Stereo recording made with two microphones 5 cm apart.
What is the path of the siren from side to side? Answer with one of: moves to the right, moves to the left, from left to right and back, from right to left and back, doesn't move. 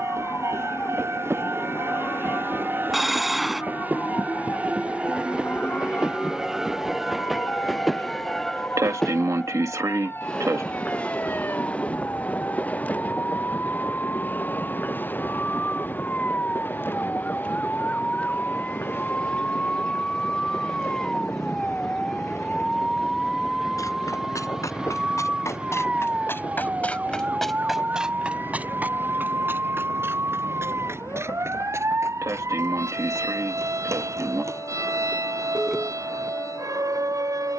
moves to the right.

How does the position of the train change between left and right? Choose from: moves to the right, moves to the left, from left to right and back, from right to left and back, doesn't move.
moves to the left.